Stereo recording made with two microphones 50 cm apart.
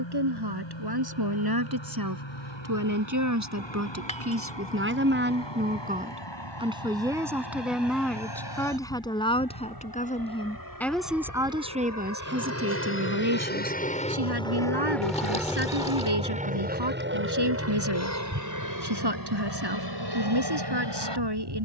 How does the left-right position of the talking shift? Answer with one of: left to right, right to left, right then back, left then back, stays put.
left then back.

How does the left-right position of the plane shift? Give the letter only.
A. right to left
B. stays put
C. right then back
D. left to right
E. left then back
D.